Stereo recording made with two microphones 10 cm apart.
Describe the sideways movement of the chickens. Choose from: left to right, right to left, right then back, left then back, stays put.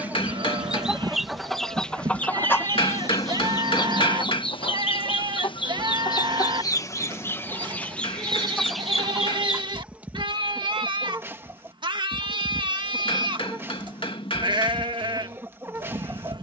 left then back.